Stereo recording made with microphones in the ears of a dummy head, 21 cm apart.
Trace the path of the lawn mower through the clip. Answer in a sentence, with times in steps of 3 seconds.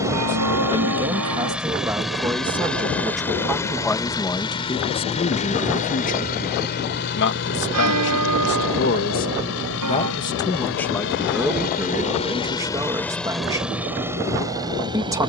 You can hear the lawn mower in the centre from 0 s, on the left from 3 s and in the centre from 12 s.